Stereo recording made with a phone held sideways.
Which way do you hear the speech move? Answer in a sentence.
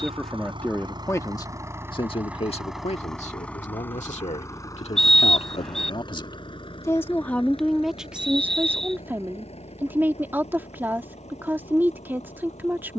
In this clip you hear the speech move from right to left and back again.